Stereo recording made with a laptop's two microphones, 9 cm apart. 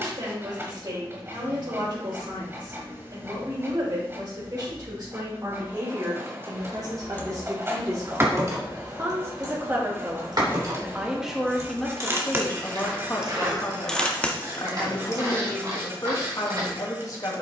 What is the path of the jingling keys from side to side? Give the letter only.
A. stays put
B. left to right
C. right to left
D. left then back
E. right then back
E.